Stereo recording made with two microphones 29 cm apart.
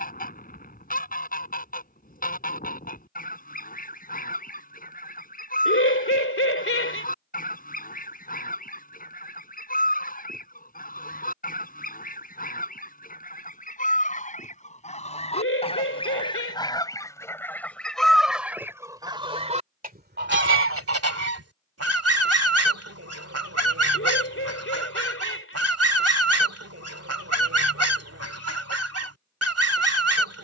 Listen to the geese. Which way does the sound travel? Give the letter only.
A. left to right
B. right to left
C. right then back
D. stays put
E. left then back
A.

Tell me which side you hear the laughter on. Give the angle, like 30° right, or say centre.
50° left.